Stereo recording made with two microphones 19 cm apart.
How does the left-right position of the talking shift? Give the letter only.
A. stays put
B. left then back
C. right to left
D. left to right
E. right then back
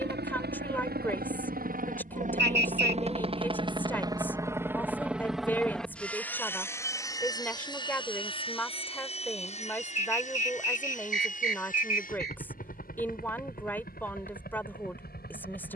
A.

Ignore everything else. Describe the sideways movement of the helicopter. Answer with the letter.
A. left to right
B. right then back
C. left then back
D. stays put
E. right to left
E.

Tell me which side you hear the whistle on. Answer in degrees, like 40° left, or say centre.
60° right.